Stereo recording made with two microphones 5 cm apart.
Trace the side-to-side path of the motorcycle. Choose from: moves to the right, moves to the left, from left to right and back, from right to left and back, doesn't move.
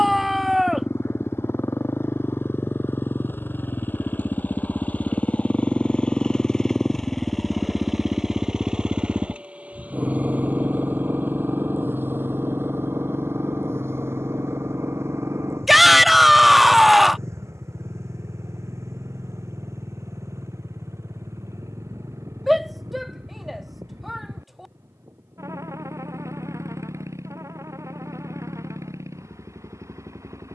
moves to the right.